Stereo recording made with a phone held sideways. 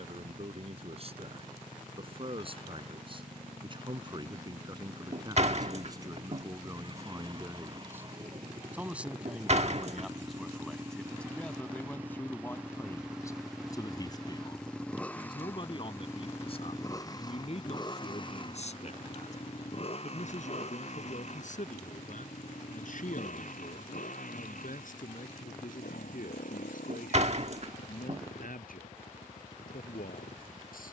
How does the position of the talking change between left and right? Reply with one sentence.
In this clip you hear the talking travel towards the left.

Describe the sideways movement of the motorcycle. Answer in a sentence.
In this clip you hear the motorcycle go from the right side to the left.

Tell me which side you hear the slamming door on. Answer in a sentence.
In this clip you hear the slamming door on the right.